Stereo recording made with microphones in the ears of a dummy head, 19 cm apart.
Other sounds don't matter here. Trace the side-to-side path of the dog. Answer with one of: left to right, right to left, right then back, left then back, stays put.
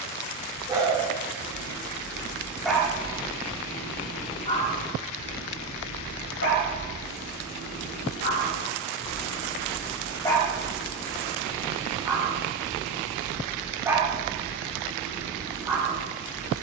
left then back.